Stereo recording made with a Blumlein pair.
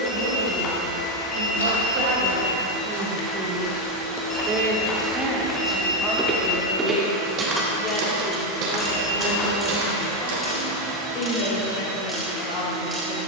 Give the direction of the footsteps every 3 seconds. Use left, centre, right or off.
left, left, right, right, off.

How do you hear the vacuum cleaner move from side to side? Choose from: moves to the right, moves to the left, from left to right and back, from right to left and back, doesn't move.
doesn't move.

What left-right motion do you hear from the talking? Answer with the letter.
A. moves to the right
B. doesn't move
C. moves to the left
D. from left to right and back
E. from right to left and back
C.